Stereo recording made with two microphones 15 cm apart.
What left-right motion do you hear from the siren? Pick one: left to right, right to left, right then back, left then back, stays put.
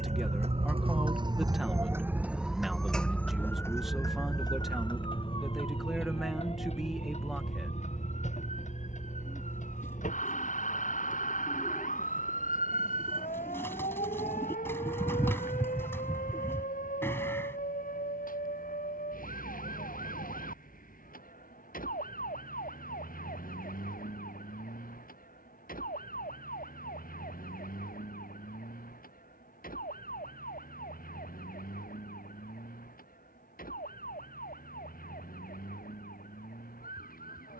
right to left.